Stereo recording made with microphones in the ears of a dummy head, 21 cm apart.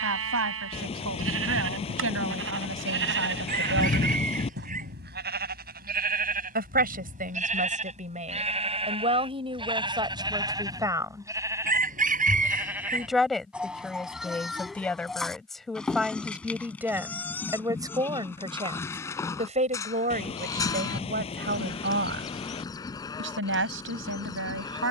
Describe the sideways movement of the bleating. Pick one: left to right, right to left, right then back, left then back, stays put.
right to left.